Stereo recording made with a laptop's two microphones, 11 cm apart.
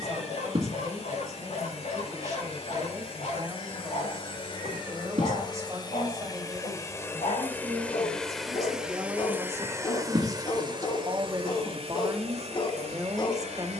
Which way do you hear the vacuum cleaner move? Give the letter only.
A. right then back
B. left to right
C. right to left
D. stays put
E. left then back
B.